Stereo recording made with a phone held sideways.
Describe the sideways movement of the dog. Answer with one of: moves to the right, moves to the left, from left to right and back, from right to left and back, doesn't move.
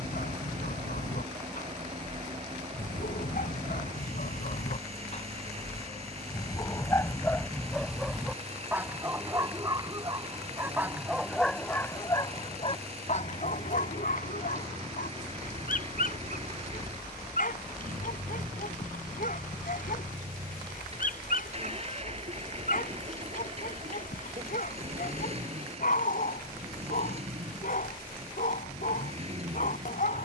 from left to right and back.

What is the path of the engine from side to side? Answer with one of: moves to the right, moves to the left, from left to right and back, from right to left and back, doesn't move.
doesn't move.